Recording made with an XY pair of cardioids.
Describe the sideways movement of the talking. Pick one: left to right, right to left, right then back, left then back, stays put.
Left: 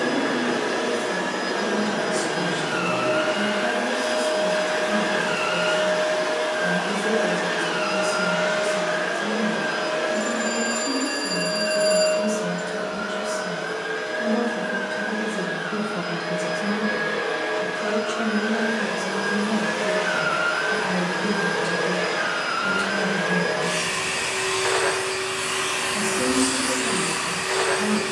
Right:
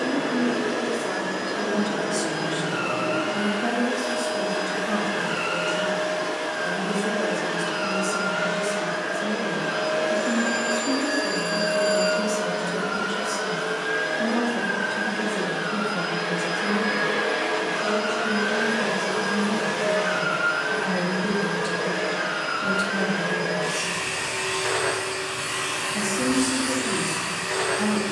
left then back.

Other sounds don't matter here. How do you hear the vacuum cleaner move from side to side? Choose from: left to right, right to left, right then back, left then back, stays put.
right then back.